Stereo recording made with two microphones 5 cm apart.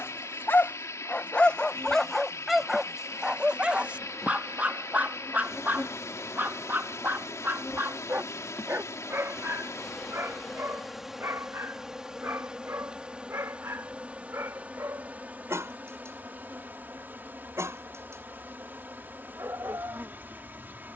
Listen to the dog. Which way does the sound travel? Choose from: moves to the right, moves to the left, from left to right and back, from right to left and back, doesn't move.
moves to the right.